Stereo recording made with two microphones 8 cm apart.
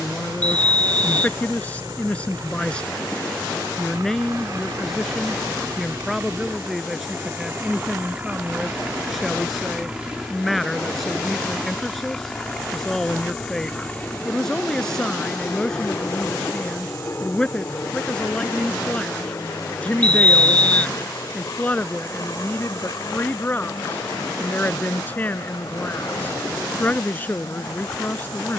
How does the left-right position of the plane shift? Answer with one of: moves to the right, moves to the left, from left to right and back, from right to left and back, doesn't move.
moves to the left.